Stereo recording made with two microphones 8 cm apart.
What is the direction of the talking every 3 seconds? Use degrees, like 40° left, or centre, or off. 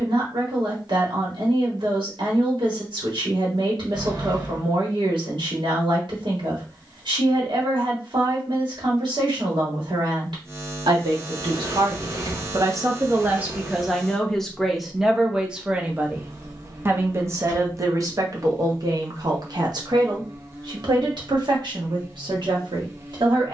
80° right, 80° right, 80° right, 70° right, 20° right, 20° right, 60° right, 70° right.